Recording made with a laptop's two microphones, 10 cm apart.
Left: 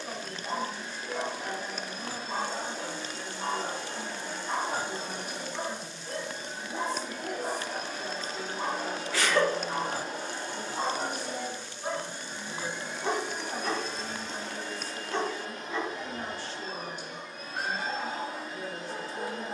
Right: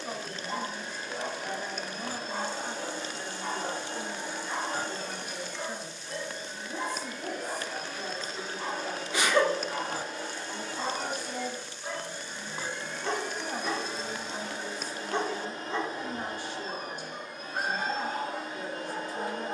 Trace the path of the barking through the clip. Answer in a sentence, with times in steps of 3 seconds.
In this clip you hear the barking on the left from 0 s, in the centre from 12 s and on the right from 15 s.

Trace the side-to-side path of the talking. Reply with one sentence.
You can hear the talking stay in one place.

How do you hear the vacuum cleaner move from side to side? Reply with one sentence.
You can hear the vacuum cleaner go left and come back.